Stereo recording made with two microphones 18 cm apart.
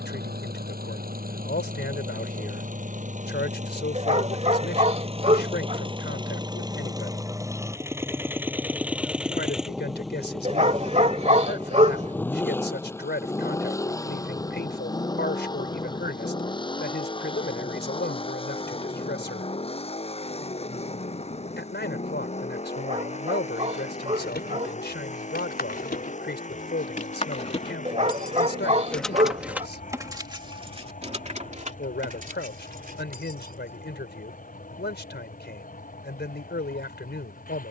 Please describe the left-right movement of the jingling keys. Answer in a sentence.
In this clip you hear the jingling keys move to the right.